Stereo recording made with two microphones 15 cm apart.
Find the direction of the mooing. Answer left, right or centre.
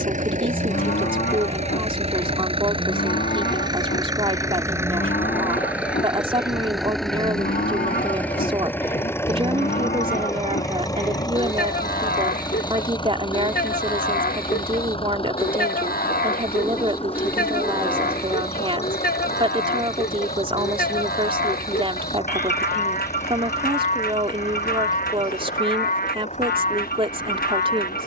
left.